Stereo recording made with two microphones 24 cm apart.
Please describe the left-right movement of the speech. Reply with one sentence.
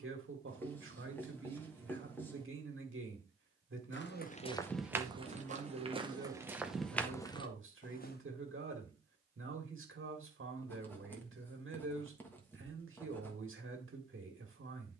You can hear the speech stay in one place.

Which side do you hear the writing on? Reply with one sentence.
In this clip you hear the writing in the centre.